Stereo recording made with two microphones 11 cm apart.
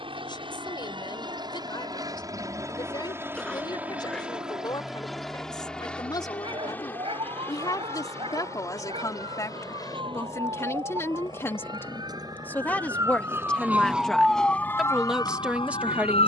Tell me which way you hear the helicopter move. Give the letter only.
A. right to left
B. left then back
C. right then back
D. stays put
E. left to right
A.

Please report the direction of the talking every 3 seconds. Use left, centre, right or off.
left, left, left, left, centre, centre.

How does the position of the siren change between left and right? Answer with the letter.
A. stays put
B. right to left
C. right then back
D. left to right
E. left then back
B.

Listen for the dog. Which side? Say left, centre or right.
right.